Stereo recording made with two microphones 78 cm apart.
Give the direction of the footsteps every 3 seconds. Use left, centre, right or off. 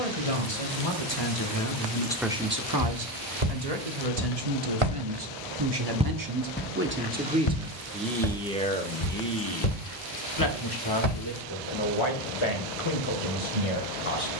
off, right, left, left, off.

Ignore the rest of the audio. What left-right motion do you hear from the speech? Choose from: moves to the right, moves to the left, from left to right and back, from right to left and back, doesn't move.
from left to right and back.